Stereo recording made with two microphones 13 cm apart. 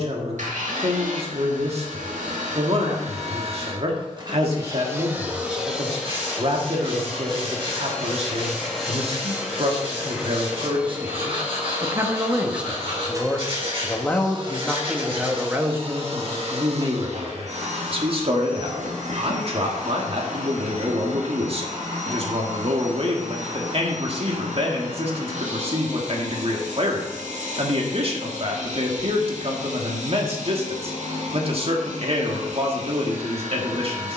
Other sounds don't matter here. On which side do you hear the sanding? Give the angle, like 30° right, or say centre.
50° right.